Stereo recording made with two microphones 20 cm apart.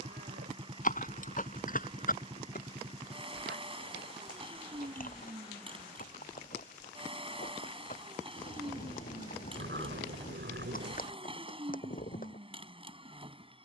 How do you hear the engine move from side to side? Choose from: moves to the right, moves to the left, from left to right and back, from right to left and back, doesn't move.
doesn't move.